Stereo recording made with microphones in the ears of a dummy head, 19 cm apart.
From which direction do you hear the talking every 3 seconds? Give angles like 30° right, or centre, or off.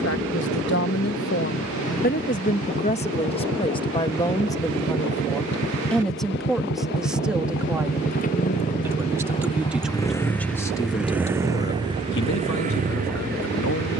50° left, 20° left, centre, 10° left, 70° left.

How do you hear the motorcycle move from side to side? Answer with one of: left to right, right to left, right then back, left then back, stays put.
left to right.